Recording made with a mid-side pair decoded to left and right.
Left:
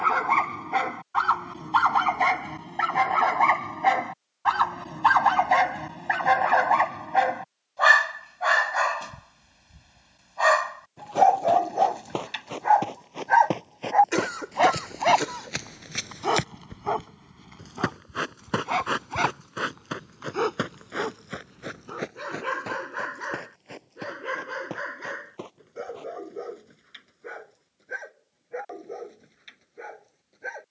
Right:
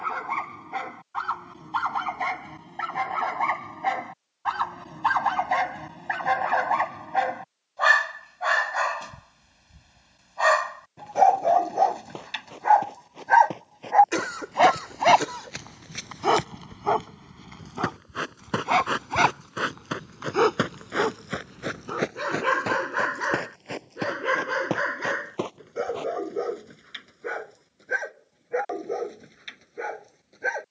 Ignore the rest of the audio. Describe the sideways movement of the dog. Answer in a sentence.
In this clip you hear the dog travel towards the right.